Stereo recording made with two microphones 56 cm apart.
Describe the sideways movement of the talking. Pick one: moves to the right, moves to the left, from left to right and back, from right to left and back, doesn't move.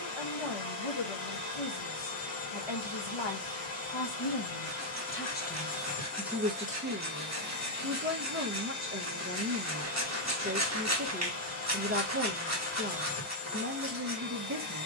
moves to the right.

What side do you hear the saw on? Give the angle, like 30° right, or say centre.
30° right.